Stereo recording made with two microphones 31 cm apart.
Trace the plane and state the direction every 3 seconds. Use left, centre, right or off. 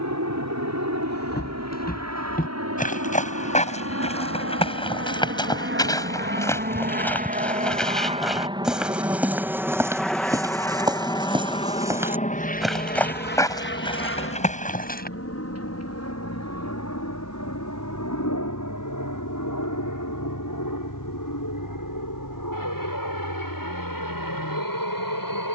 right, right, right, centre, left, left, left, left, left.